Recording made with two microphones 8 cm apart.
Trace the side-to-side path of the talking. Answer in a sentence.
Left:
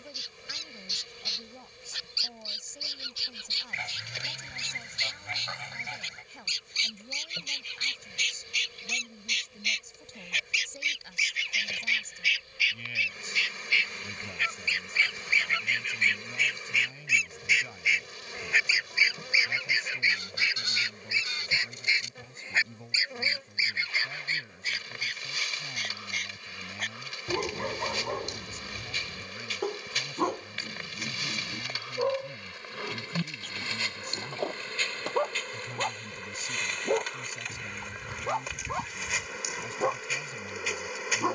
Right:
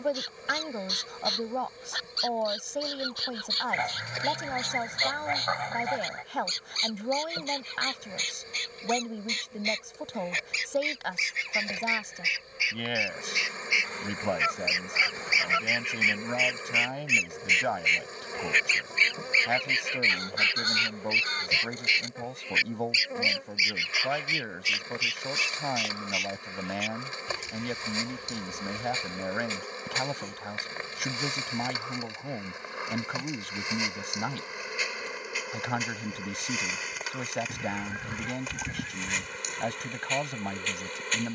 You can hear the talking stay put.